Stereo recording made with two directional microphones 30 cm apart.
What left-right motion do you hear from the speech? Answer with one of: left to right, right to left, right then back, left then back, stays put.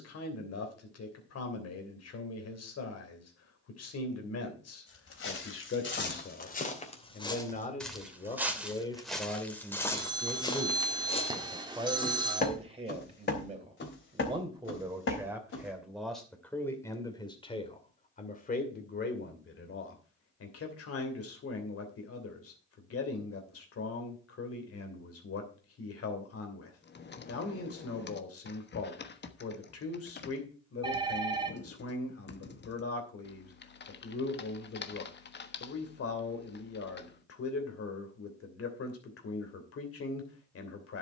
right then back.